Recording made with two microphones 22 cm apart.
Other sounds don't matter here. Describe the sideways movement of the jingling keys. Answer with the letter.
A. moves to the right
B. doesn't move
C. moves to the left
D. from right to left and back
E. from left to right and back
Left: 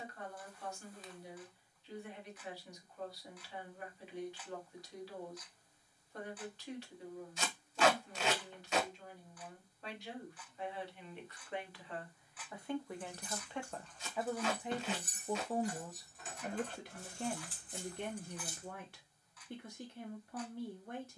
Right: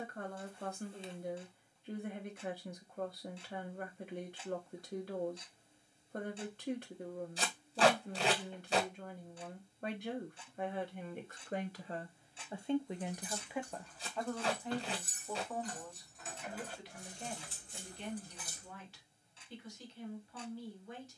D.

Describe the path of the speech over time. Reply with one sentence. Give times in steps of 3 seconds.
In this clip you hear the speech on the right from 0 s, in the centre from 12 s and on the left from 15 s.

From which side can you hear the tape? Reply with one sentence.
In this clip you hear the tape on the right.